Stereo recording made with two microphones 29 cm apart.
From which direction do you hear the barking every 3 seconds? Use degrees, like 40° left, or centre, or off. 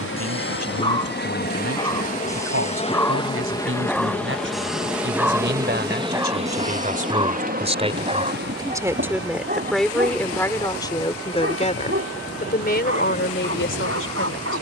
10° left, centre, 20° right, 40° right, 50° right.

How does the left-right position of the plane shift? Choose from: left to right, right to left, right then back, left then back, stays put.
left to right.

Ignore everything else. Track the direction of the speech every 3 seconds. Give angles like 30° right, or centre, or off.
50° right, 40° right, 20° right, 10° left, 40° left.